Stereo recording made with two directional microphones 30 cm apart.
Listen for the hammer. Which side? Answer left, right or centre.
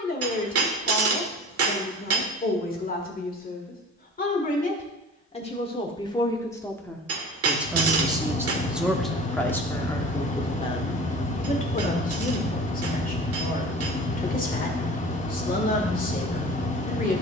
right.